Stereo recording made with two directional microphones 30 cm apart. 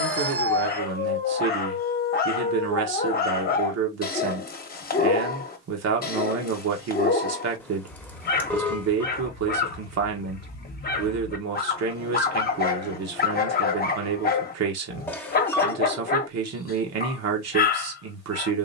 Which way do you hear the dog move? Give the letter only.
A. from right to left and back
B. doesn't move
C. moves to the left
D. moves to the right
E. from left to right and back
B.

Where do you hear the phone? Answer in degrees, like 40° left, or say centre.
10° left.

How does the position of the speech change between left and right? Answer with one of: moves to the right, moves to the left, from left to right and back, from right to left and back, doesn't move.
doesn't move.